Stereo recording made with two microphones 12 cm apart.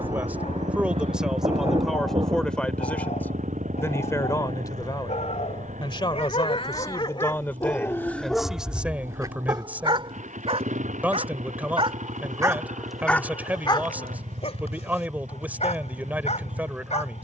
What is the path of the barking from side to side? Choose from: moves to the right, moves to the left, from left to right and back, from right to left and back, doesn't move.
from left to right and back.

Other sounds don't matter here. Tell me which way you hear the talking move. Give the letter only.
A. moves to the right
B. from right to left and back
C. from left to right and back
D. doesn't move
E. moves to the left
B.